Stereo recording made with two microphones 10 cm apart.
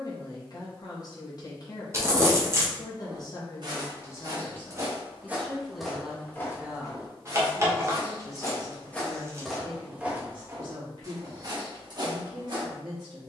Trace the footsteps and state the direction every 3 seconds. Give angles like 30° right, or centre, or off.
off, 30° right, 30° left, 20° right, 50° right.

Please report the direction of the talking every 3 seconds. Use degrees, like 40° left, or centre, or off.
40° left, 20° left, 20° right, 50° right, 50° right.